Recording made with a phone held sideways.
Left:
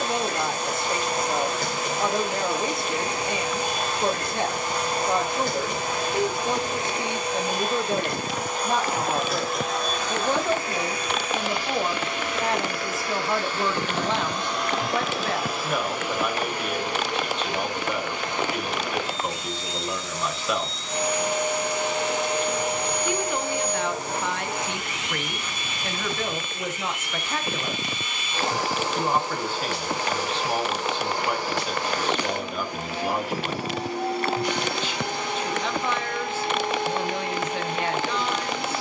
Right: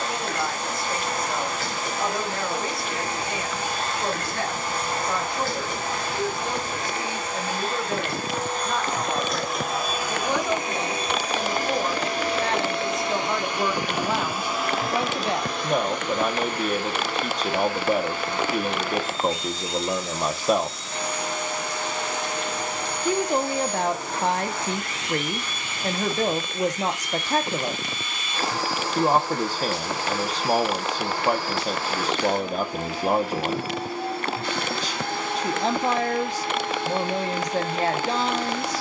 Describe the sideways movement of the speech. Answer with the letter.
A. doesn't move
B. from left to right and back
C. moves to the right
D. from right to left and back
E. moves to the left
C.